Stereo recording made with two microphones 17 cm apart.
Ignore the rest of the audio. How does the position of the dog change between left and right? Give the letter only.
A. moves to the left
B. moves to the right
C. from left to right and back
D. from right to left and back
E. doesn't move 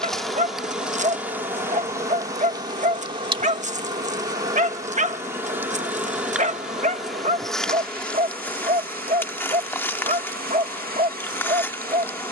E.